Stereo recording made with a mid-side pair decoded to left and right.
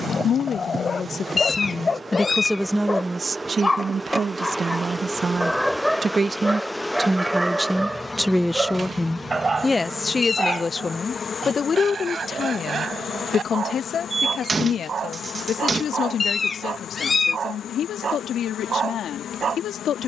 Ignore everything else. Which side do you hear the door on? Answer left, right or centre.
right.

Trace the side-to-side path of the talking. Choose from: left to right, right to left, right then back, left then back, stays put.
right then back.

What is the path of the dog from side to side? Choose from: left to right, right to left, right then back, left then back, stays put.
left to right.